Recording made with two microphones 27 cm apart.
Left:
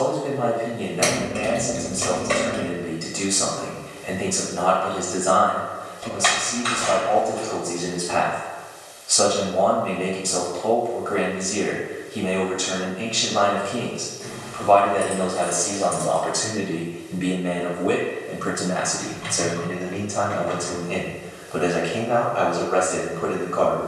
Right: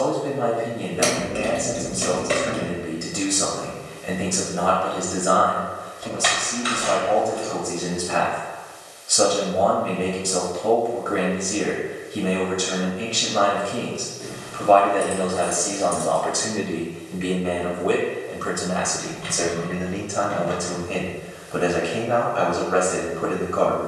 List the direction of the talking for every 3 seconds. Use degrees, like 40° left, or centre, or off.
20° right, 20° right, 20° right, 20° right, 20° right, 10° left, centre, 20° right.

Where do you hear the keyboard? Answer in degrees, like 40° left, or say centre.
10° right.